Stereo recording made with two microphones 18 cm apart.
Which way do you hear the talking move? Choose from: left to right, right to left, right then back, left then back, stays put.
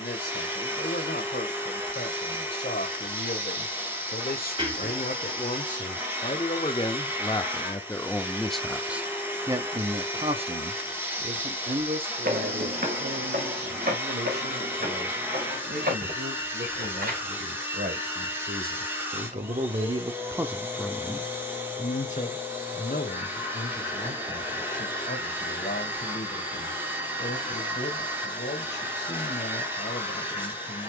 right then back.